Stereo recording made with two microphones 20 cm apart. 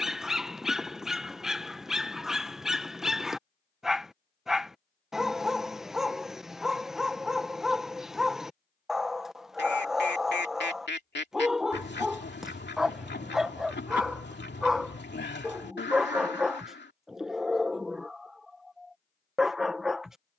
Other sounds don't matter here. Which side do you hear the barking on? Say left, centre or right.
centre.